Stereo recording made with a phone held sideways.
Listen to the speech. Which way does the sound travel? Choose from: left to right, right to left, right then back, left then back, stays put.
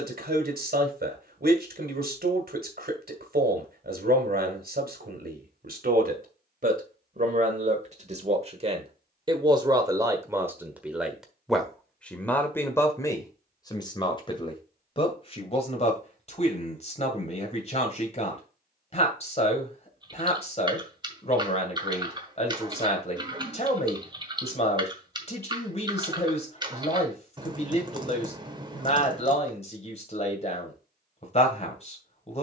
right to left.